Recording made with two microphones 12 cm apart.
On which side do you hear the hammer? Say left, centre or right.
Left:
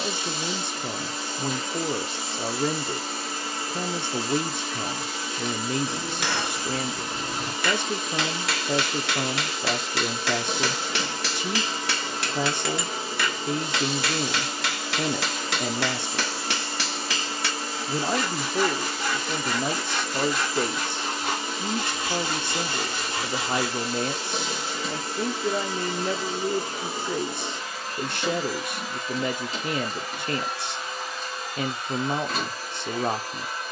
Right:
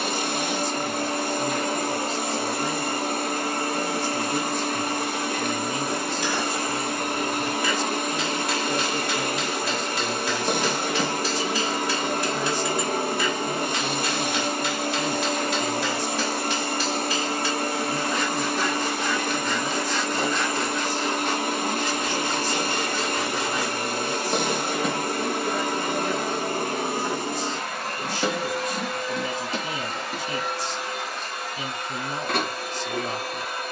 left.